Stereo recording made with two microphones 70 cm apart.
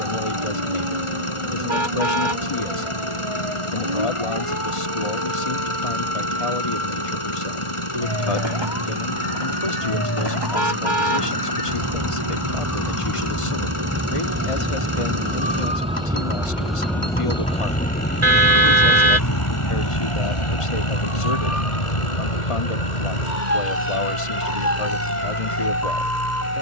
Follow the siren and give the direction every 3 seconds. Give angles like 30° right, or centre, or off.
50° right, 50° right, 40° right, 30° right, 20° right, centre, 30° left, 60° left, 80° left.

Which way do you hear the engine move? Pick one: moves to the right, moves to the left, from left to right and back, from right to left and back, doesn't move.
doesn't move.